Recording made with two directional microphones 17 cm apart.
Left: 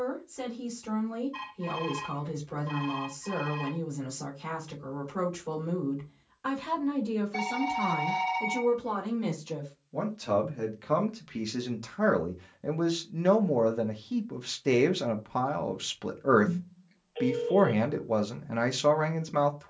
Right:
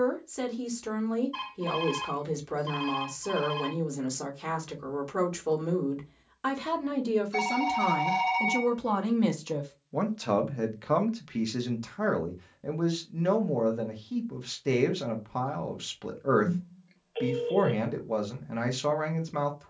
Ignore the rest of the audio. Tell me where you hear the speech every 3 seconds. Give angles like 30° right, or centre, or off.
60° right, 60° right, 50° right, 20° right, 10° left, 10° left, 10° left.